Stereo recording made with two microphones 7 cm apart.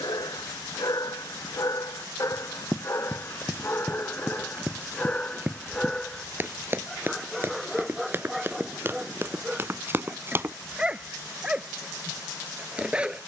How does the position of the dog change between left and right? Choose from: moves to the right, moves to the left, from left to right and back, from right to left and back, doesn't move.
moves to the right.